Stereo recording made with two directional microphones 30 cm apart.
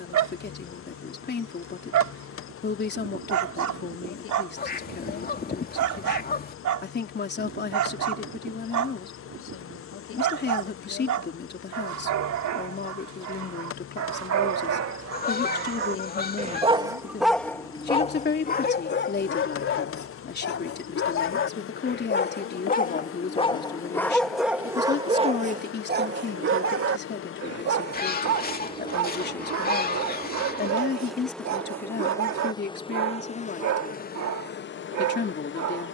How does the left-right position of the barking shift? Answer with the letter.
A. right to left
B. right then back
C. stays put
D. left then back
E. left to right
D.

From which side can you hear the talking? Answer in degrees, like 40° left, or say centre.
30° left.